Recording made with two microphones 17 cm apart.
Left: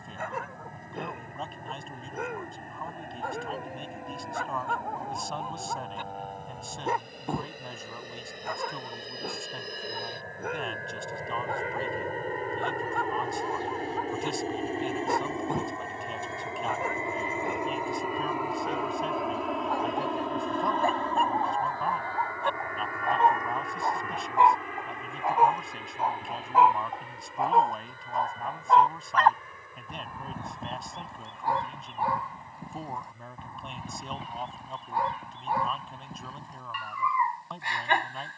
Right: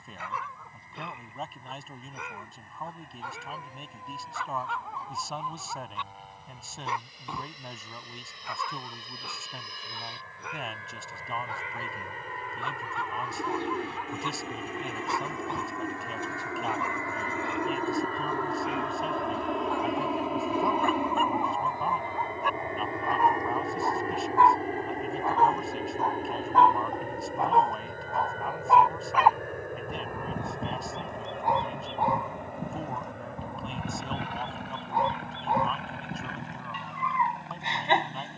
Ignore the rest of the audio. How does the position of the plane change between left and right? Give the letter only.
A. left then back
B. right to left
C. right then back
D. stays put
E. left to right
E.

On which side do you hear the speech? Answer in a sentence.
In this clip you hear the speech in the centre.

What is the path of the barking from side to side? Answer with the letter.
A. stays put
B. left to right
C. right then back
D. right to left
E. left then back
B.